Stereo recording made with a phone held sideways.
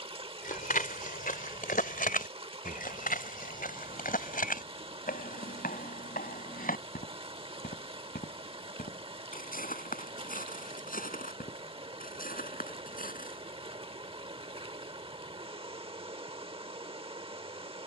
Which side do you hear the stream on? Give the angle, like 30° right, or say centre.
40° right.